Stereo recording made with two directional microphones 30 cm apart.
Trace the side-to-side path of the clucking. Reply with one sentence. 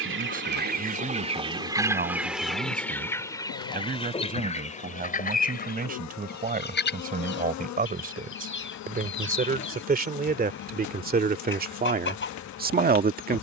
In this clip you hear the clucking travel towards the left.